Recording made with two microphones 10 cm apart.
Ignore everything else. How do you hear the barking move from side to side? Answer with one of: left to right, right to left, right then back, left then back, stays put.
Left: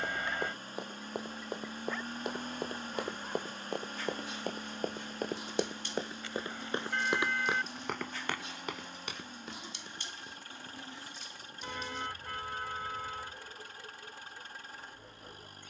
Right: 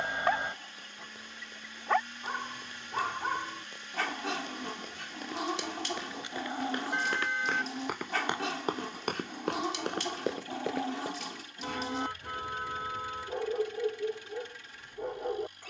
stays put.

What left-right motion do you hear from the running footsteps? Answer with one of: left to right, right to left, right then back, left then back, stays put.
left to right.